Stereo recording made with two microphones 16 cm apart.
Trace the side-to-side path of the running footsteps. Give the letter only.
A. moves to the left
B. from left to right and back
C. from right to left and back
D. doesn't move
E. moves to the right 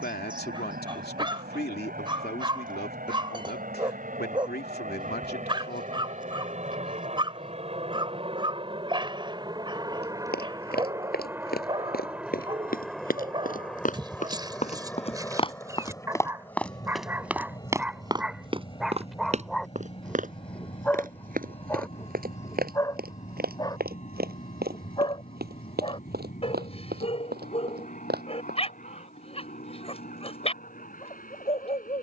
E.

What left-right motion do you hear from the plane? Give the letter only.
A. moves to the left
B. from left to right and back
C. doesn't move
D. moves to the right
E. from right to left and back
A.